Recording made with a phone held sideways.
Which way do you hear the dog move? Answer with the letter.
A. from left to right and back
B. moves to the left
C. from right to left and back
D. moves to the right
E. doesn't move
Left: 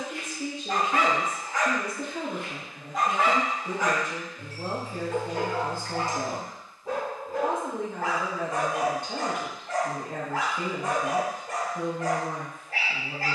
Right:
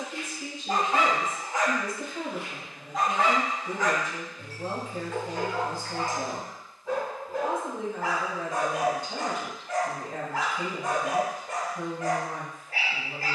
B.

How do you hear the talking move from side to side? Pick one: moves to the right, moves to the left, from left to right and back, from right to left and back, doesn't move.
doesn't move.